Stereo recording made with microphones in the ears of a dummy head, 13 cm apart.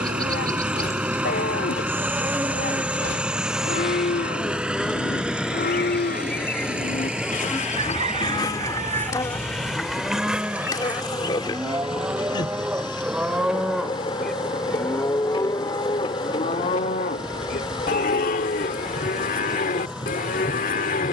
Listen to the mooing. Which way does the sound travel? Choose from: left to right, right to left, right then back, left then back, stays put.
right then back.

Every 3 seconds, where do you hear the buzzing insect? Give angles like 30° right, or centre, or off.
20° right, centre, 20° left, 30° left, 30° left, 30° left, 30° left.